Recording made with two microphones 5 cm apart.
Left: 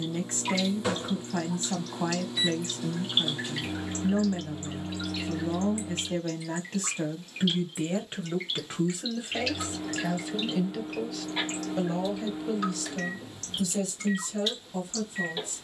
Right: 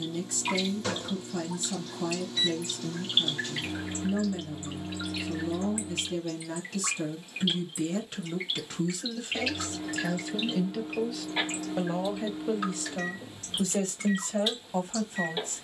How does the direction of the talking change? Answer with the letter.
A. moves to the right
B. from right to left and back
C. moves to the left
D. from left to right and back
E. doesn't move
A.